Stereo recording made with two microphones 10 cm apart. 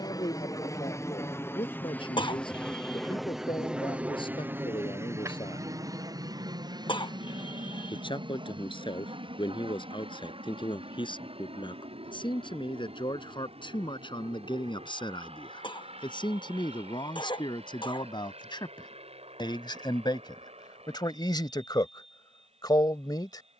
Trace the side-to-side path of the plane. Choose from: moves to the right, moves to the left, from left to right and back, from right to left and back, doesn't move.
moves to the right.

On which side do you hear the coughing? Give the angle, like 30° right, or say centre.
60° left.